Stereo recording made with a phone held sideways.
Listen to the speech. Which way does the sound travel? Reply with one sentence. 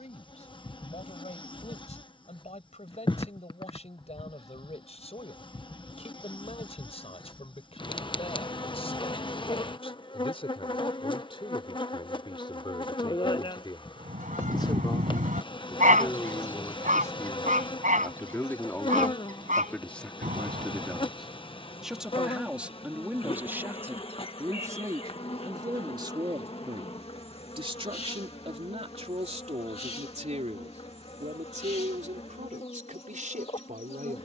In this clip you hear the speech travel towards the right.